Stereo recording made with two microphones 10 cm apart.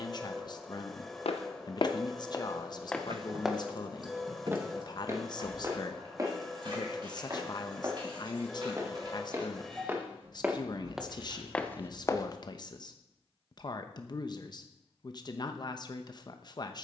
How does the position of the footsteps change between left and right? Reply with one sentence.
You can hear the footsteps go right and come back.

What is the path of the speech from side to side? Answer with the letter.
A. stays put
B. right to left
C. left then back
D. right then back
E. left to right
A.